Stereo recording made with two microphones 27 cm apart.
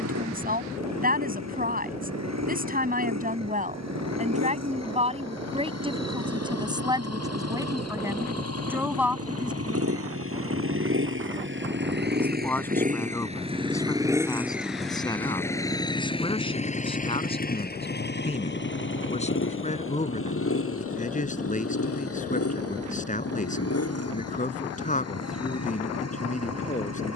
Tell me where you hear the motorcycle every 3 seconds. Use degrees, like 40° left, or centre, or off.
80° right, 80° right, 70° right, 50° right, 20° right, 20° left, 50° left, 60° left, 70° left.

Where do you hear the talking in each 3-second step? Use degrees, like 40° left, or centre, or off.
30° right, 30° right, 10° right, centre, 10° left, 20° left, 30° left, 30° left, 30° left.